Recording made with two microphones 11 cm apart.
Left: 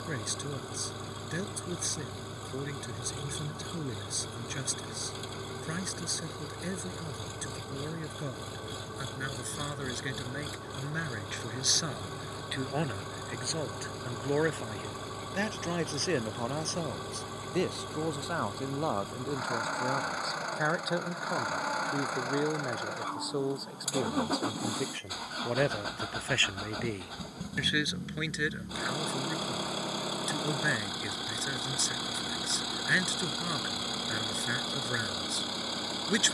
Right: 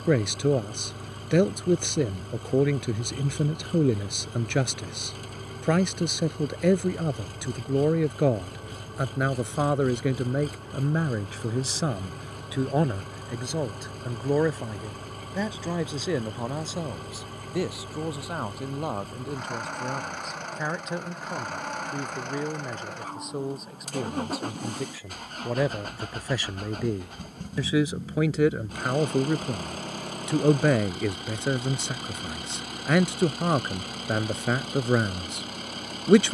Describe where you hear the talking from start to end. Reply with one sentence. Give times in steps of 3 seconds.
In this clip you hear the talking on the right from 0 s, in the centre from 15 s and on the right from 27 s.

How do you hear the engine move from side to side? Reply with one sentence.
In this clip you hear the engine stay put.